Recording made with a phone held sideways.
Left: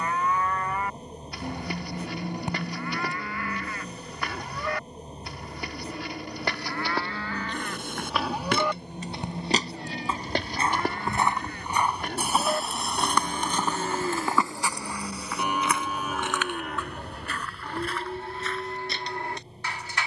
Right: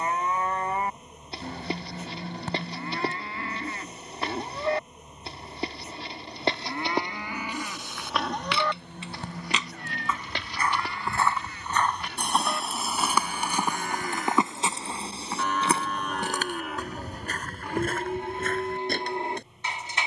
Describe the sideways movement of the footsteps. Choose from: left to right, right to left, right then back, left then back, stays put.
left to right.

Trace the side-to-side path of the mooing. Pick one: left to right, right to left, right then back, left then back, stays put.
left then back.